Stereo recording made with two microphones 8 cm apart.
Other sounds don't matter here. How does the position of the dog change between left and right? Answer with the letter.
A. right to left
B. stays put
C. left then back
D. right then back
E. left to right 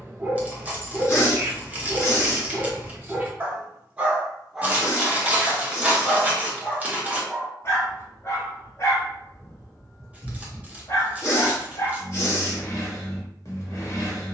A.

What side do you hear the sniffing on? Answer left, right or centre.
left.